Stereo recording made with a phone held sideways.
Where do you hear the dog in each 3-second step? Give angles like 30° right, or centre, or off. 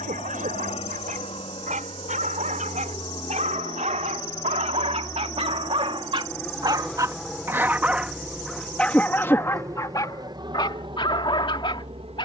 70° right, 60° right, 20° right, 30° left.